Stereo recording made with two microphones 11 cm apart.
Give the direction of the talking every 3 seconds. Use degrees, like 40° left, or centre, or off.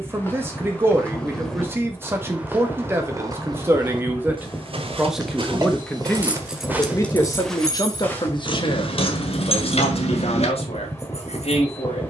20° right, 10° right, 30° left, 60° left.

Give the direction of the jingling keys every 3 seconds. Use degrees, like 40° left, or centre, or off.
off, 30° right, 20° left, 60° left.